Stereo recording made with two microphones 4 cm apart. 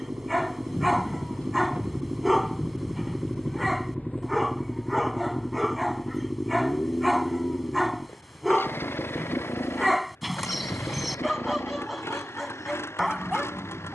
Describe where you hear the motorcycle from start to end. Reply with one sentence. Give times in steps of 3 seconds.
In this clip you hear the motorcycle on the right from 0 s, in the centre from 3 s and on the left from 6 s.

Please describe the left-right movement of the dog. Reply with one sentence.
In this clip you hear the dog stay in one place.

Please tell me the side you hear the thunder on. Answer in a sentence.
You can hear the thunder on the left.